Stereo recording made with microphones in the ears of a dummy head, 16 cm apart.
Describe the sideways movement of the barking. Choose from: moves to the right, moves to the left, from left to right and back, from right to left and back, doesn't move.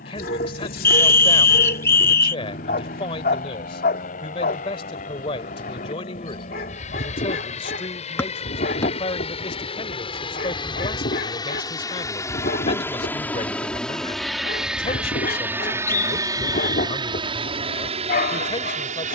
doesn't move.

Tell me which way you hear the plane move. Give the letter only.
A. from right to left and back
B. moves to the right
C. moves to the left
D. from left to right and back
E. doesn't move
B.